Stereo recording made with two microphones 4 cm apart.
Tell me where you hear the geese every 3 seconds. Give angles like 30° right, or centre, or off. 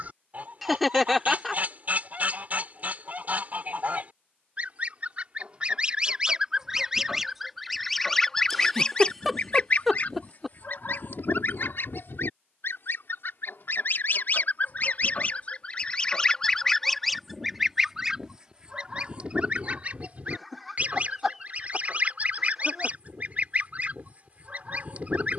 40° right, 30° right, centre, 50° left, 60° left, 20° left, 30° right, 40° right, 40° right.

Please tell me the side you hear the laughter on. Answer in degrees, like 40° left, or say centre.
centre.